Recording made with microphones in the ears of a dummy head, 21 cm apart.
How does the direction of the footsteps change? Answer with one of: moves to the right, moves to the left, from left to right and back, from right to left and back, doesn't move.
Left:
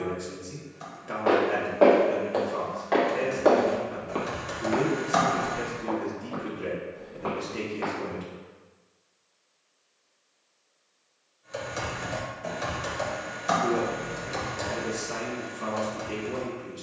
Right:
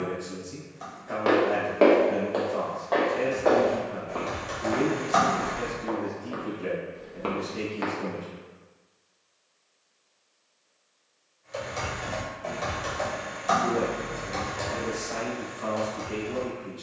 from right to left and back.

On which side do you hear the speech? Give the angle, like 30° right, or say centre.
40° left.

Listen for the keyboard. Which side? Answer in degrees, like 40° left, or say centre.
10° left.